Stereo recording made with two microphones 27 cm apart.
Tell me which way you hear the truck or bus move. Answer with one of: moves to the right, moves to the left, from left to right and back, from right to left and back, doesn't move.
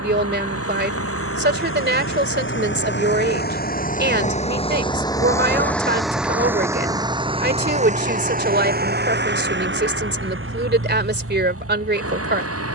moves to the right.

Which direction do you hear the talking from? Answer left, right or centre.
right.